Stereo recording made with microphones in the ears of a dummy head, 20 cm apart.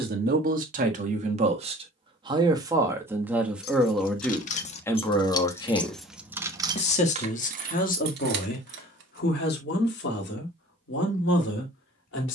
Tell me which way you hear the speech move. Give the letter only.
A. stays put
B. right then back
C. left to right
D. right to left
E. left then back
D.